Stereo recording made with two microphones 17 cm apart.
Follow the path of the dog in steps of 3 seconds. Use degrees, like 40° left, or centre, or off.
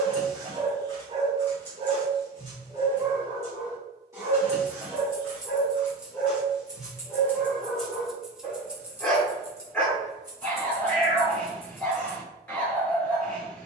30° right, 20° right, centre, 10° left, 10° left.